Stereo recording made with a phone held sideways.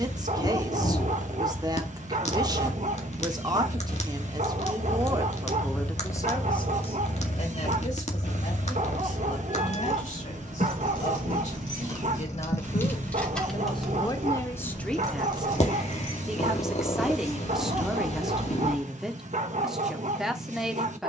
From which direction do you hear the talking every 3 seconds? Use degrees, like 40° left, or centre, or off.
30° right, 20° right, 40° left, 60° left, 30° left, centre, centre.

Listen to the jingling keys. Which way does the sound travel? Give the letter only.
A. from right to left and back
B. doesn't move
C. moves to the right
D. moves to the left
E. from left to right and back
C.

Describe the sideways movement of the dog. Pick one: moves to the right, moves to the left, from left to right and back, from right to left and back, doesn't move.
doesn't move.